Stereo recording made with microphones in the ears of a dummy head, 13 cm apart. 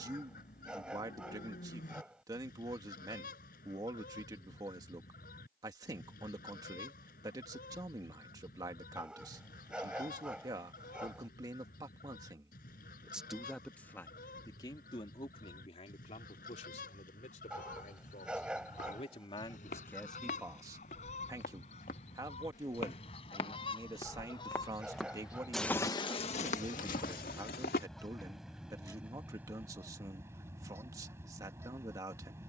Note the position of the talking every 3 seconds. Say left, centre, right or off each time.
right, right, right, right, centre, left, left, right, right, right, right.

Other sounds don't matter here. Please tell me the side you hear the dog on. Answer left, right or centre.
centre.